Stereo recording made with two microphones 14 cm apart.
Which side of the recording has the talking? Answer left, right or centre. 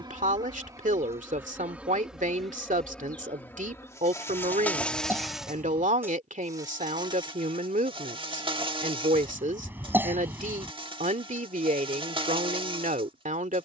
right.